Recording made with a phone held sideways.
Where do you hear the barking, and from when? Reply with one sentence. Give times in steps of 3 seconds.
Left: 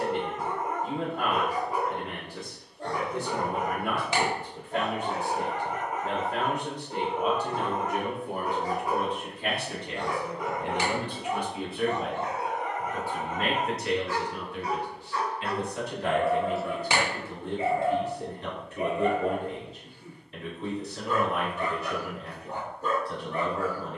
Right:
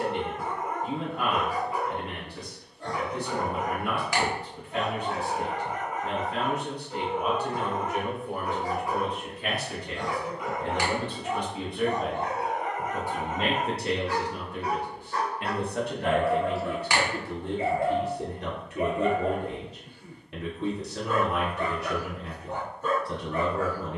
You can hear the barking on the left from 0 s, on the right from 12 s, in the centre from 15 s and on the left from 18 s.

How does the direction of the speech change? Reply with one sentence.
You can hear the speech travel towards the right.